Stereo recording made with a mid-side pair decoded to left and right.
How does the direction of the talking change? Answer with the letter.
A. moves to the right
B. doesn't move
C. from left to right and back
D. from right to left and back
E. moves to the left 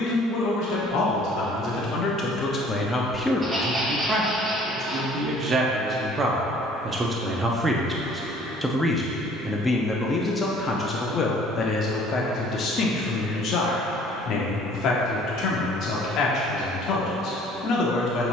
C.